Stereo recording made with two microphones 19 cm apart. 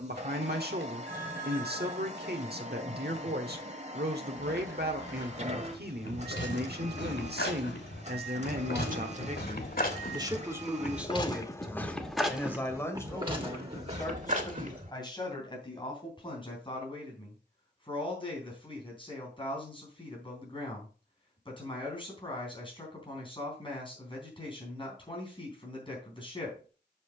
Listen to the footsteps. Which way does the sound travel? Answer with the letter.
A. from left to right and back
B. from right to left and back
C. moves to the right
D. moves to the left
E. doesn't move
C.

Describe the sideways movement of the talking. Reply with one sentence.
You can hear the talking move to the left.